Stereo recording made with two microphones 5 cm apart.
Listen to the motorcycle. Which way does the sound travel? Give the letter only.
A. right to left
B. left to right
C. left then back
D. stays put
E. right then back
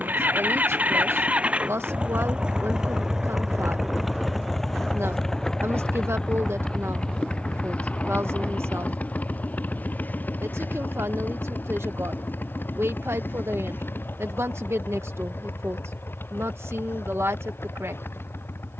A.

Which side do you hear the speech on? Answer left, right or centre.
right.